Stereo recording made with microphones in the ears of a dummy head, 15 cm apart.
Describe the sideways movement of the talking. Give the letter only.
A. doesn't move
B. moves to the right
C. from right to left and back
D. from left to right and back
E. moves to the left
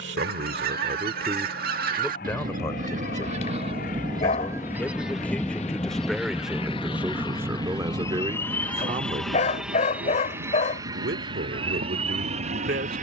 C.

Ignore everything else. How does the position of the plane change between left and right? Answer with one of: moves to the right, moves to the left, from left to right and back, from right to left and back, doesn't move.
moves to the right.